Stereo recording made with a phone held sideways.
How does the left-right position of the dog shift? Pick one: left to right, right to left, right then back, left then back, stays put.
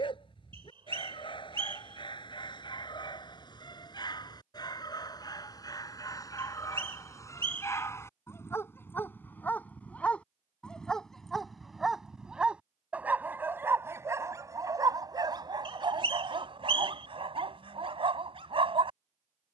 left to right.